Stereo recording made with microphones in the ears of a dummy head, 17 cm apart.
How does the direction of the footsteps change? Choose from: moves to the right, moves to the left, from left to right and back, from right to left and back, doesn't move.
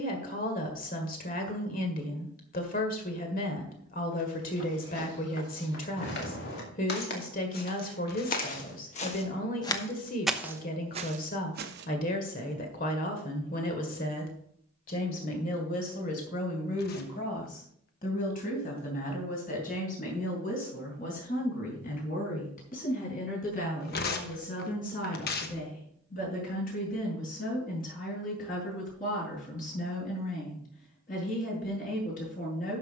moves to the right.